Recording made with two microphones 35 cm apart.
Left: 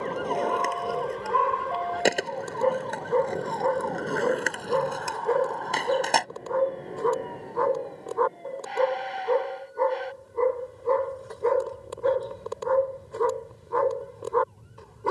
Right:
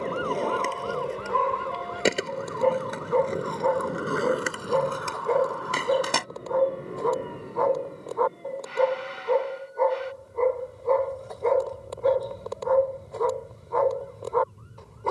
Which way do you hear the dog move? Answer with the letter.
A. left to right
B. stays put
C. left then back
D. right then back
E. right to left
B.